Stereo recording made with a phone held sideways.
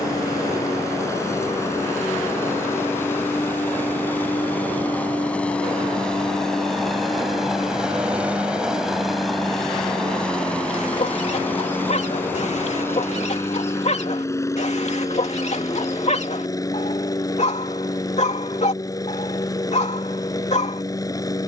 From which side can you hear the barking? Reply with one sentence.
In this clip you hear the barking on the left.